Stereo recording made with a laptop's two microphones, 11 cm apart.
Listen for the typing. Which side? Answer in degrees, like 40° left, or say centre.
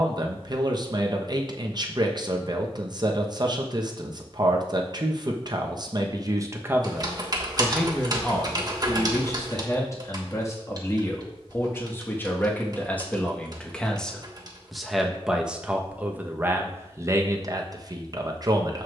40° right.